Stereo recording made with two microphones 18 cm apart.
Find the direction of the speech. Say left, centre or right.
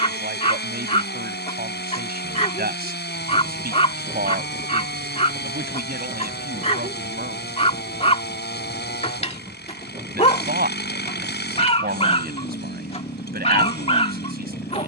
right.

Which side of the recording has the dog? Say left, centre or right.
left.